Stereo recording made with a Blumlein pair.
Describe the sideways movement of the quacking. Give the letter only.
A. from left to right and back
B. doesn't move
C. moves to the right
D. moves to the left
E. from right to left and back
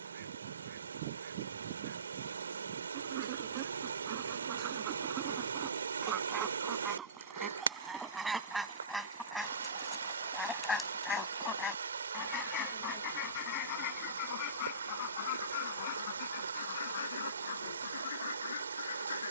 D.